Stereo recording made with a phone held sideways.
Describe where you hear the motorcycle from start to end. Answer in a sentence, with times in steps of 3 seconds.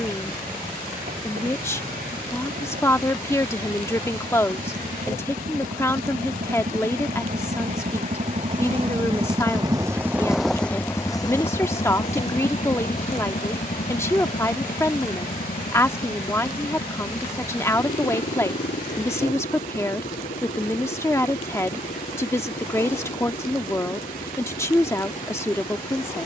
In this clip you hear the motorcycle on the right from 0 s, in the centre from 9 s and on the left from 12 s.